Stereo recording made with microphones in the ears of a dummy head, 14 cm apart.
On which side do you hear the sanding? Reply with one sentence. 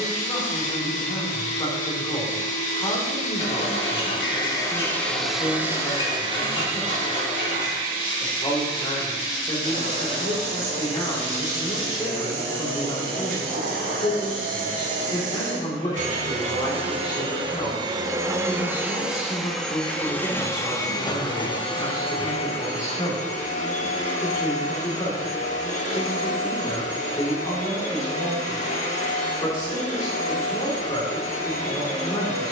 In this clip you hear the sanding on the left.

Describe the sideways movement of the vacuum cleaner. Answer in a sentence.
You can hear the vacuum cleaner go right and come back.